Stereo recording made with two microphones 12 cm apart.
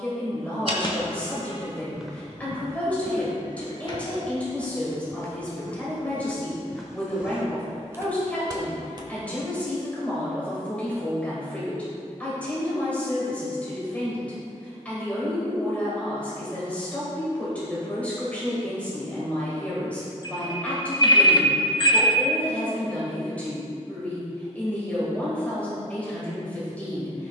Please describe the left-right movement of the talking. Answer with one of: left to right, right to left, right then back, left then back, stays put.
stays put.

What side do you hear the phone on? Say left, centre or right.
left.